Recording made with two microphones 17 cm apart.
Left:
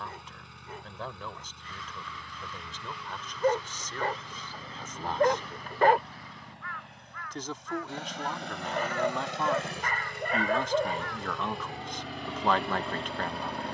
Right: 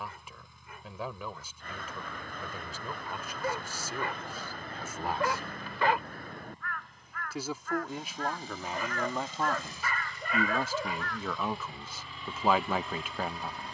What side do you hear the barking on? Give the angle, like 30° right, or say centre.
50° left.